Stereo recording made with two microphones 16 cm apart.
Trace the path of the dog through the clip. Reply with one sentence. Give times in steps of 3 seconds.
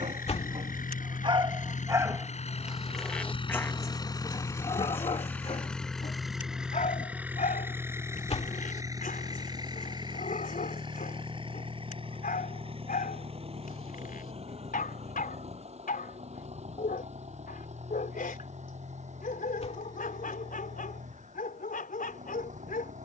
In this clip you hear the dog on the right from 0 s and on the left from 3 s.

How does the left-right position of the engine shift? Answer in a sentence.
In this clip you hear the engine move to the right.